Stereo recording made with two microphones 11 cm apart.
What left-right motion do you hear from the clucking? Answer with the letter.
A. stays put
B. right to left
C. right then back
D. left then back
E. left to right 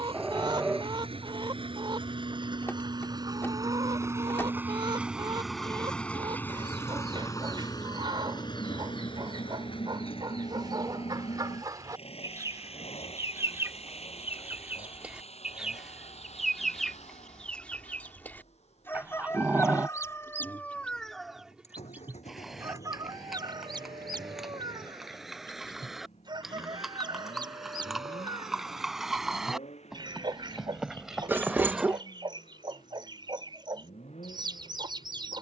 D.